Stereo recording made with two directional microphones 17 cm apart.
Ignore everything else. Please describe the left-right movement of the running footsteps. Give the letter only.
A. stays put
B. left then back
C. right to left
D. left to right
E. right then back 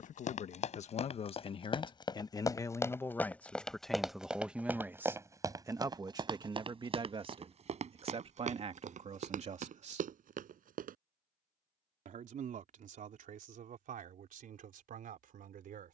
D.